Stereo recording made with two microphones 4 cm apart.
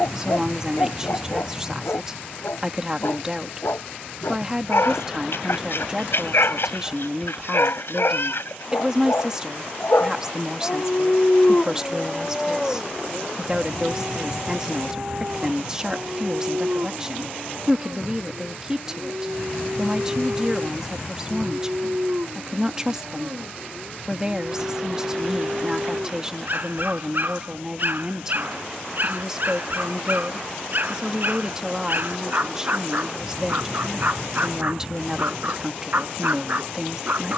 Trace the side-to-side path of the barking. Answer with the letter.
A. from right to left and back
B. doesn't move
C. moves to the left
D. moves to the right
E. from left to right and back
D.